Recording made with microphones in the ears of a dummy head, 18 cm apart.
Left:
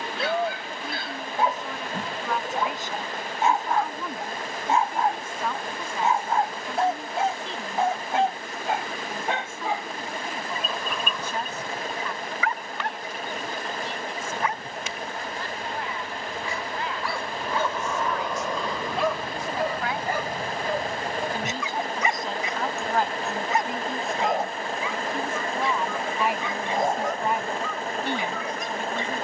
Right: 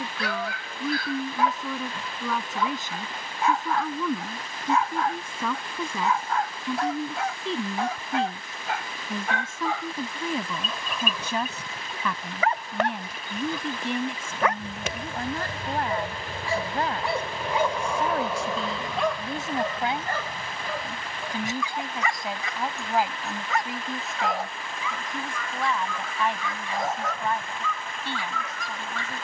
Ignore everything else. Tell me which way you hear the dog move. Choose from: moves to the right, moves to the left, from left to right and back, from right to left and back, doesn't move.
from left to right and back.